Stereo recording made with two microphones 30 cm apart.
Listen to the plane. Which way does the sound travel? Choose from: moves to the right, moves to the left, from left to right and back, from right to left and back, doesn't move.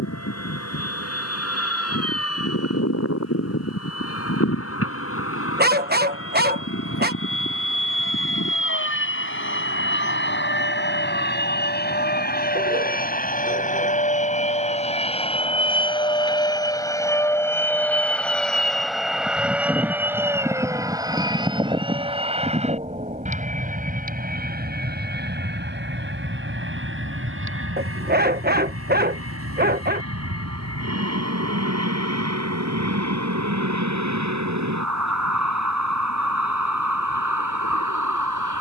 moves to the right.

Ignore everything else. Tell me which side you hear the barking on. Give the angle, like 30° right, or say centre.
30° right.